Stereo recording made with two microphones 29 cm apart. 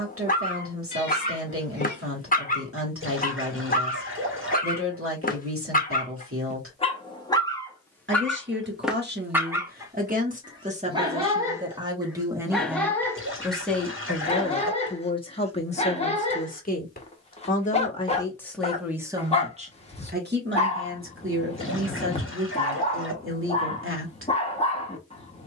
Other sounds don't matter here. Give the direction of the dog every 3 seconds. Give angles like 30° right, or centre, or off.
30° left, 30° left, 10° left, 10° right, 10° left, 20° left, 20° left, 20° left, 20° left.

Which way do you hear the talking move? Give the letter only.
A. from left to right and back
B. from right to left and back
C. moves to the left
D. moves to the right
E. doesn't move
B.